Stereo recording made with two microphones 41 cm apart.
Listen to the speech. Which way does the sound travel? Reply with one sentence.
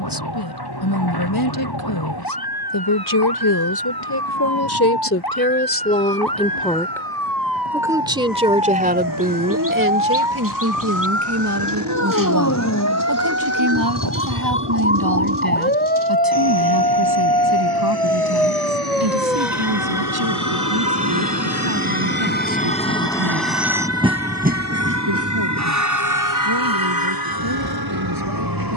In this clip you hear the speech move from left to right.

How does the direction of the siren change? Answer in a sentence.
In this clip you hear the siren travel towards the right.